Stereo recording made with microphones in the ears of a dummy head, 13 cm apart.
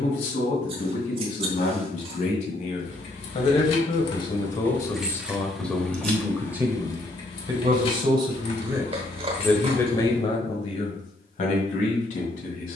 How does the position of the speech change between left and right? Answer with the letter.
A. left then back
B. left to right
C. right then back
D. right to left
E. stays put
C.